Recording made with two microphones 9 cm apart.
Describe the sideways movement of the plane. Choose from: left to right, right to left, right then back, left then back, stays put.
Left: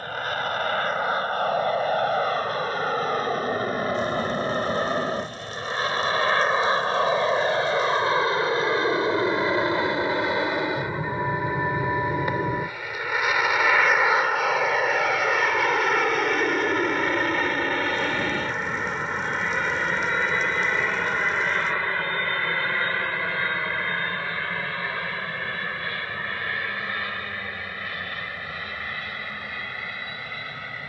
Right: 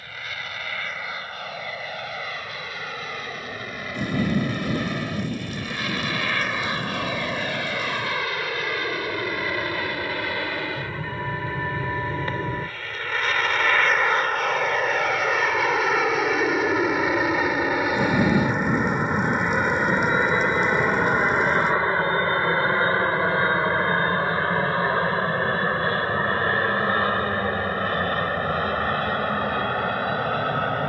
left to right.